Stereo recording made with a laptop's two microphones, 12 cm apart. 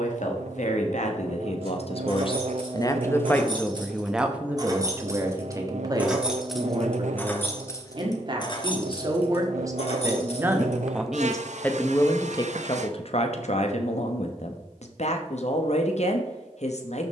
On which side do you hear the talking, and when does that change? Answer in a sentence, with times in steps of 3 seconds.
You can hear the talking on the left from 0 s, in the centre from 3 s, on the right from 6 s, in the centre from 9 s and on the left from 12 s.